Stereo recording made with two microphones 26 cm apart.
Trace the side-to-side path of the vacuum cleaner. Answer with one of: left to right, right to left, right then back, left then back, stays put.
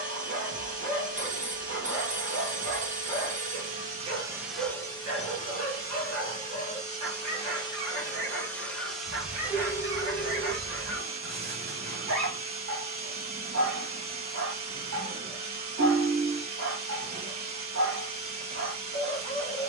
left then back.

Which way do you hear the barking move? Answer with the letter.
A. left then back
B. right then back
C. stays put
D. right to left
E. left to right
C.